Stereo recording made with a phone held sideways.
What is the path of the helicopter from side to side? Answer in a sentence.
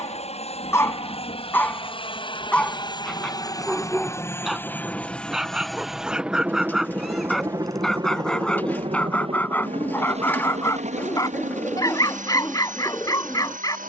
In this clip you hear the helicopter move from left to right.